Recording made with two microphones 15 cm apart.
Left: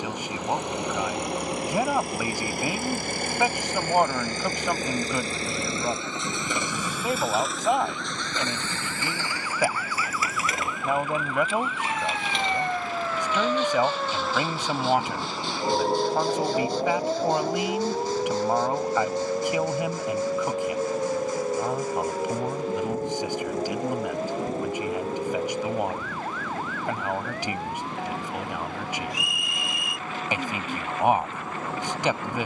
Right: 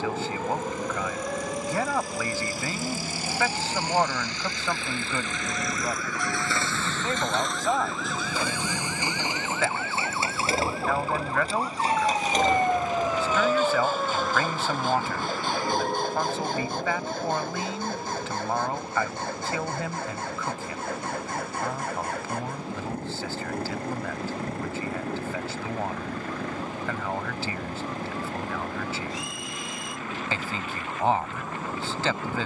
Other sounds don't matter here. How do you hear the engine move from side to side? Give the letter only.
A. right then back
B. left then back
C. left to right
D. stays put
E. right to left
C.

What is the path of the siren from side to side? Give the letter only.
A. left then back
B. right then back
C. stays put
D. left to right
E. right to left
E.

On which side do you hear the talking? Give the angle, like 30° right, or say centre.
10° left.